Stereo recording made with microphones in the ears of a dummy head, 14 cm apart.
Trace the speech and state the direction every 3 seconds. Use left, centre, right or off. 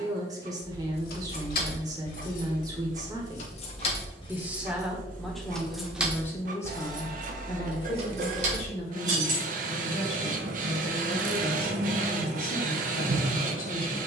right, centre, left, left, left.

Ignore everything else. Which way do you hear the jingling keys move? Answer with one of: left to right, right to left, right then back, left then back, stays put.
left to right.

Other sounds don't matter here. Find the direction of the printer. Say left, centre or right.
right.